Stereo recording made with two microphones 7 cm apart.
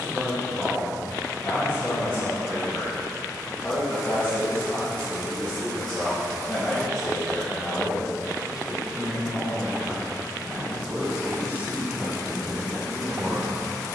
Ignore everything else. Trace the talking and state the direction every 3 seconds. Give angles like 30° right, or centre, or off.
20° left, 20° left, 10° left, 10° right, 30° right.